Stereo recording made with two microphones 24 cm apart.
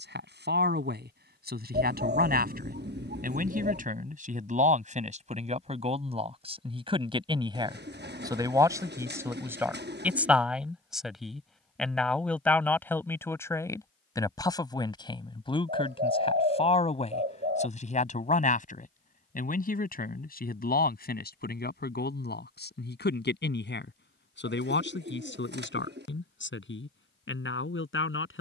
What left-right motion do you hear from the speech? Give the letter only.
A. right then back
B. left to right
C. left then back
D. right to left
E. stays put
D.